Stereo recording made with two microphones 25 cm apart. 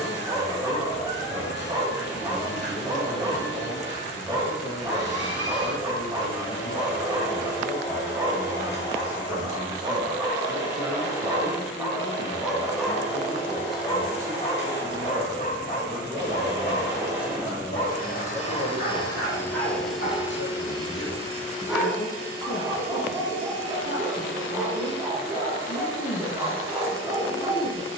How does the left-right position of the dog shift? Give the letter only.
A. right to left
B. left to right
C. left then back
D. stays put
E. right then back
C.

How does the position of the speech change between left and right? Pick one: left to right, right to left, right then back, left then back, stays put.
right then back.